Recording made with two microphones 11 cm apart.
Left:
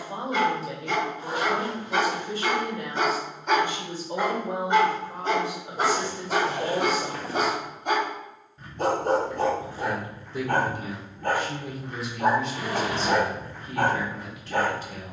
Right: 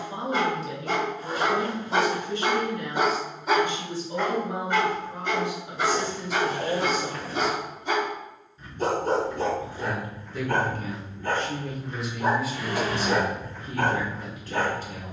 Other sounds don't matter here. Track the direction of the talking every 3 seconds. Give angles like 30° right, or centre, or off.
40° left, 40° left, 40° left, 20° left, 20° right.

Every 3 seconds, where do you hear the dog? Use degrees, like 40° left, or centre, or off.
30° right, 20° left, 60° left, 60° left, 60° left.